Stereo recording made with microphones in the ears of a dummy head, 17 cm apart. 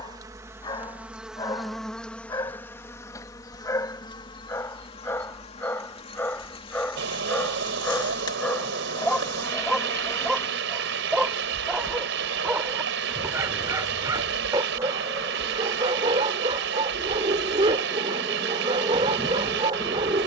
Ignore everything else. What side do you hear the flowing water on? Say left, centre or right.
right.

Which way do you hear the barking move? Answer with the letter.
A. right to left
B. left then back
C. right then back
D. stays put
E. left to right
E.